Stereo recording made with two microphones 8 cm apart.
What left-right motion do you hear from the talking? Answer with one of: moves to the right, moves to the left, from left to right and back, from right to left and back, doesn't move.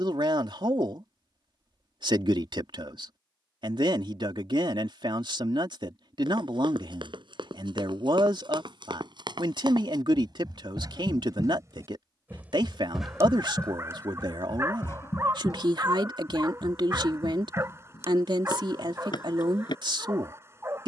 doesn't move.